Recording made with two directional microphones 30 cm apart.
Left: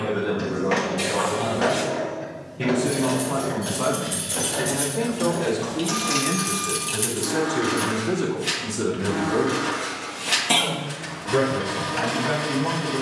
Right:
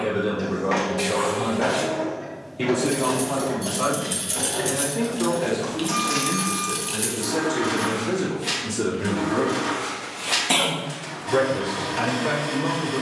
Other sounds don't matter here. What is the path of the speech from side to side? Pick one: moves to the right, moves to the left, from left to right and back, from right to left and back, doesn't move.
from right to left and back.